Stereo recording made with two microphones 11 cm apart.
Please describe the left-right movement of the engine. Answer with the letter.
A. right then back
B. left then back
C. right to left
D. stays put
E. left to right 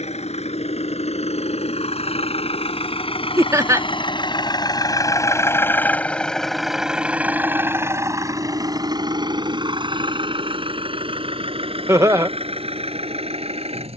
E.